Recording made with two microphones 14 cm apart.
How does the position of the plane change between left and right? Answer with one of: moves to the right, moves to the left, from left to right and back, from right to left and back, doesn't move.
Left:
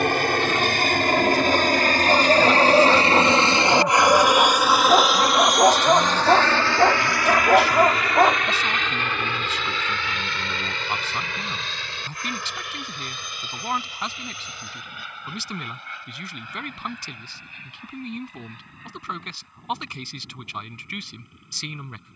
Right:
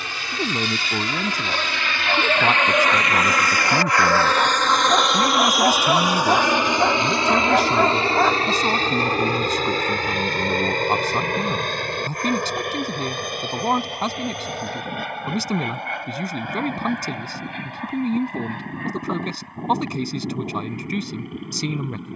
moves to the right.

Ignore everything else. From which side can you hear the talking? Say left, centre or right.
right.